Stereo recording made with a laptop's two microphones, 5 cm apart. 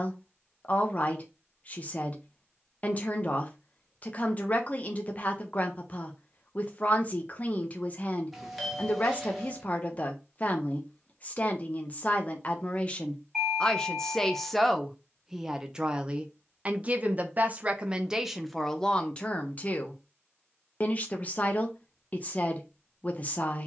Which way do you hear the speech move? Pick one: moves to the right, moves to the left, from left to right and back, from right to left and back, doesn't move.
from left to right and back.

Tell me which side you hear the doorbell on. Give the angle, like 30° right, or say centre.
centre.